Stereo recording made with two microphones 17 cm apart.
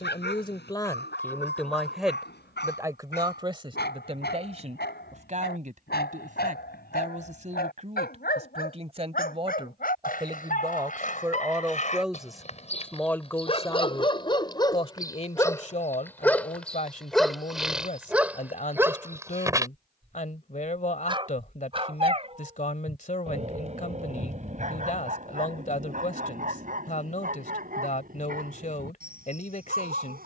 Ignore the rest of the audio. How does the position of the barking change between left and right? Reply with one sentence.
In this clip you hear the barking move to the right.